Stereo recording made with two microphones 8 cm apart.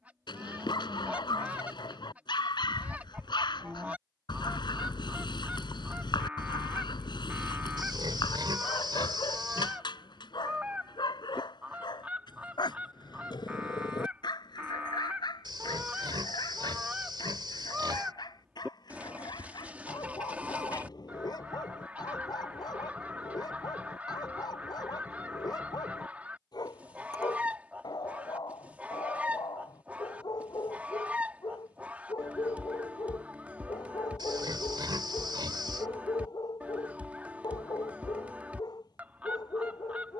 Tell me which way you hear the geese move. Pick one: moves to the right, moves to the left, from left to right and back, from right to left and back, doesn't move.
doesn't move.